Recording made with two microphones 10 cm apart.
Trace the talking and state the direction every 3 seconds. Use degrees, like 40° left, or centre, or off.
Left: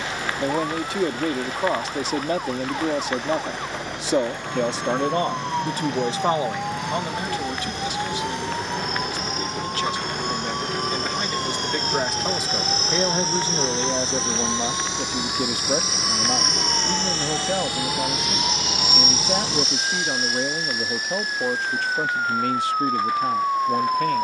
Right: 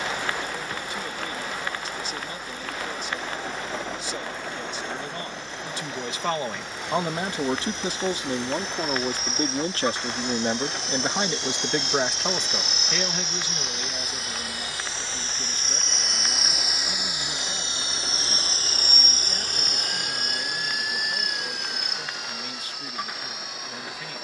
70° left, 60° left, 20° right, 30° right, 30° left, 60° left, 60° left, 60° left.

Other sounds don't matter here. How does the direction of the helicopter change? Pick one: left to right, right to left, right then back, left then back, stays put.
left to right.